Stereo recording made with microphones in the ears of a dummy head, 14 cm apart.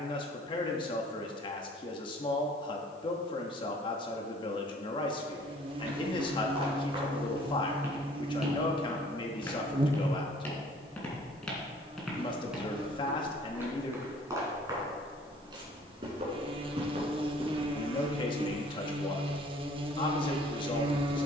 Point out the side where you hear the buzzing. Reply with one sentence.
In this clip you hear the buzzing on the right.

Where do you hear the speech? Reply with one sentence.
In this clip you hear the speech on the left.